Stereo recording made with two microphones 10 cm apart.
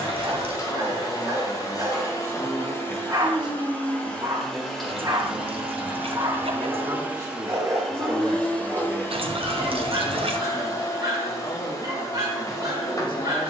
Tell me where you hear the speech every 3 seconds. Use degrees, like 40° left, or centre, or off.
30° left, 30° right, 20° right, 30° left, 50° left.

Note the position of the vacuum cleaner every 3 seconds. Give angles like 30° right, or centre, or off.
40° left, centre, centre, 40° left, 40° left.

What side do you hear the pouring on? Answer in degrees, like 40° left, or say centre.
70° right.